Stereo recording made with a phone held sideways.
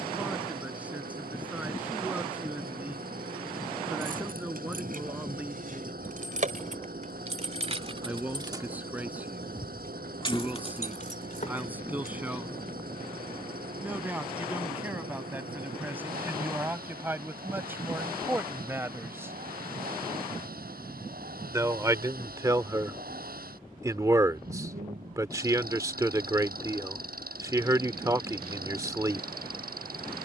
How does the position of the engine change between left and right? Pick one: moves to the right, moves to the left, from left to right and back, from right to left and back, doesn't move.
doesn't move.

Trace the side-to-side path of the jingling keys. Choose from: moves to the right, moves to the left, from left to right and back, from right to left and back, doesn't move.
moves to the left.